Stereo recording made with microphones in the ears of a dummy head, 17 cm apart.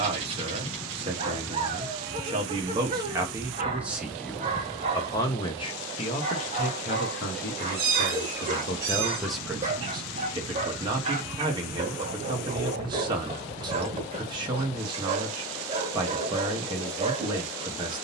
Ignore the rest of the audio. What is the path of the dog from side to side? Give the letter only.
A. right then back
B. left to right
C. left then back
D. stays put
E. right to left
D.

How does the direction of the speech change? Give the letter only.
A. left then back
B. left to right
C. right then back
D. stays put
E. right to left
A.